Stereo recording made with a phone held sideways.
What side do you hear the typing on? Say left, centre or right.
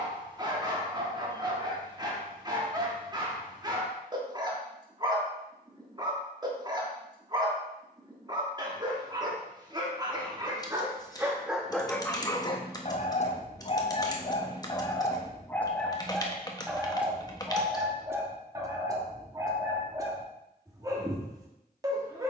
left.